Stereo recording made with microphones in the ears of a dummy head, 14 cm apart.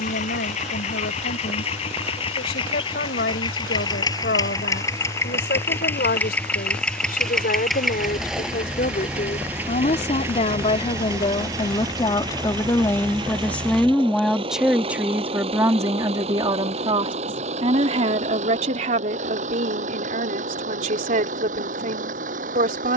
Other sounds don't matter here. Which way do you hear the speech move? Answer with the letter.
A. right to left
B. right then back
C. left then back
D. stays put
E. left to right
E.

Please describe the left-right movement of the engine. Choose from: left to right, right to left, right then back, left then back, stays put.
left to right.